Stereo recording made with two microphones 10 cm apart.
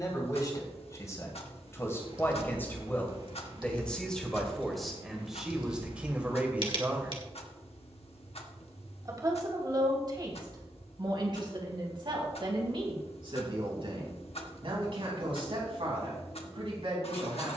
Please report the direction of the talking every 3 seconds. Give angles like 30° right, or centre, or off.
30° left, centre, 20° right, 50° right, 60° right, 60° right.